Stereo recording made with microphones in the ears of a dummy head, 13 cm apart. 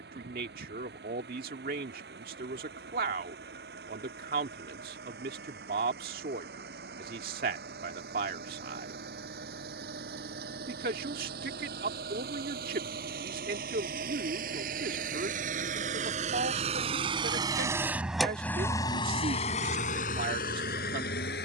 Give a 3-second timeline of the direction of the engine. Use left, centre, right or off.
right, right, right, right, right, right, left.